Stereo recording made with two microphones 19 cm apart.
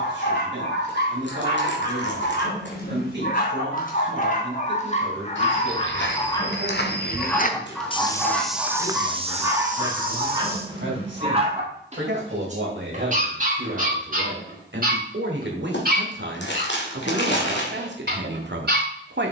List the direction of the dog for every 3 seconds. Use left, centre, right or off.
left, left, centre, right, right, right, right.